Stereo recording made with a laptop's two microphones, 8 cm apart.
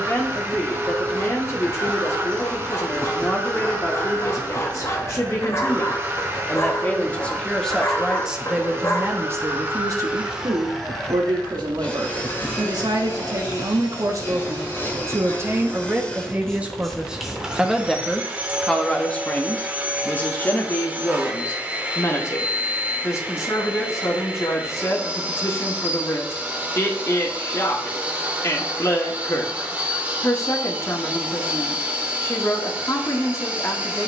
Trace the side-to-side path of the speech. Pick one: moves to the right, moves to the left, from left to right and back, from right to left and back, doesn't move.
from left to right and back.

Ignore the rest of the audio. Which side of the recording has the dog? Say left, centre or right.
left.